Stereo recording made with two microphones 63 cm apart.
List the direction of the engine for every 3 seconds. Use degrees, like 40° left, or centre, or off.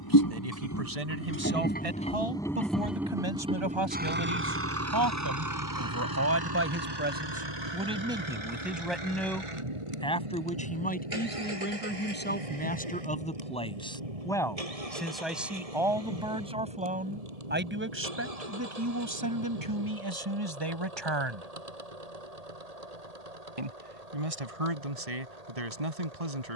20° left, 20° right, 40° right, 50° right, 60° right, 60° right, 70° right, 70° right, 70° right.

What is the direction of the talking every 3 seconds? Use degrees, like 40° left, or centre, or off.
60° right, 40° right, 10° right, 10° left, 10° left, 10° right, 30° right, 50° right, 60° right.